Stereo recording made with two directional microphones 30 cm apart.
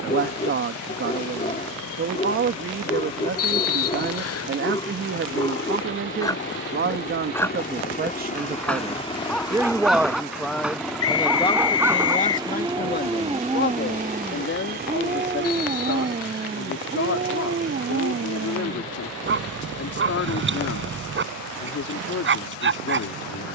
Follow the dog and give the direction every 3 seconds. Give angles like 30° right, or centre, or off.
20° left, 20° left, 10° left, centre, 10° right, 30° right, 40° right, 40° right.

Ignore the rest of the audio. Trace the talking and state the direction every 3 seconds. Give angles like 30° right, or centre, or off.
40° right, 40° right, 30° right, centre, 30° left, 50° left, 50° left, 50° left.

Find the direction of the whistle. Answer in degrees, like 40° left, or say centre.
50° left.